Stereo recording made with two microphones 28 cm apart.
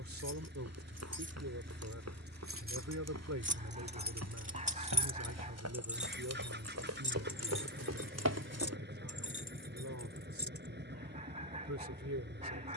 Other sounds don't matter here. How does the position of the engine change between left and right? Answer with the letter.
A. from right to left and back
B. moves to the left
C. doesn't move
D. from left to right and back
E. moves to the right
C.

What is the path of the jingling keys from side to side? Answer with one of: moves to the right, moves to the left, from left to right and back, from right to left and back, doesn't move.
moves to the left.